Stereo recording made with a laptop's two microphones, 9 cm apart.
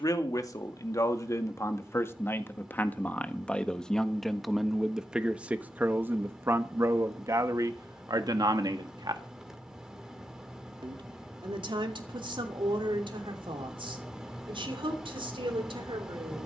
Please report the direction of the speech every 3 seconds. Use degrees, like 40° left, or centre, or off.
30° left, centre, 40° right, 60° right, 70° right, 80° right.